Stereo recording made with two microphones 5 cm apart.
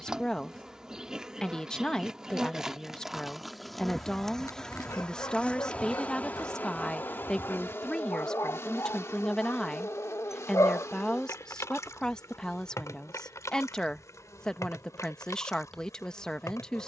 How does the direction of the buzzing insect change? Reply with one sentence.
In this clip you hear the buzzing insect move from right to left.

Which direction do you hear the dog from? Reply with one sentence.
In this clip you hear the dog on the left.